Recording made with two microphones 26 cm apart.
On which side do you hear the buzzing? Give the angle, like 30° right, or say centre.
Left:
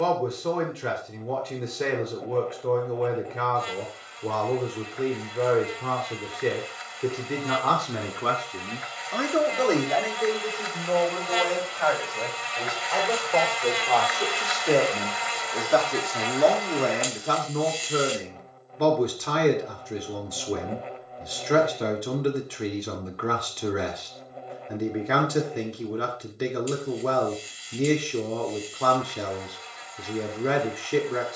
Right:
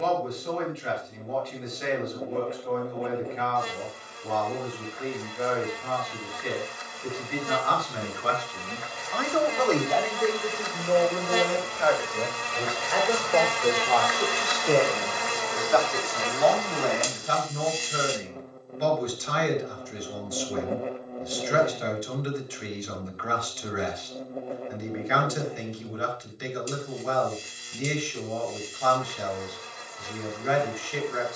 50° right.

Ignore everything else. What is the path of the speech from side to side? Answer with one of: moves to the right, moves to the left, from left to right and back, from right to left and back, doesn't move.
from left to right and back.